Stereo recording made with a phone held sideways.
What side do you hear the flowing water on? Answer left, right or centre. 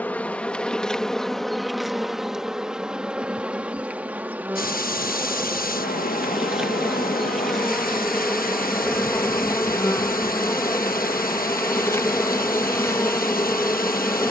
left.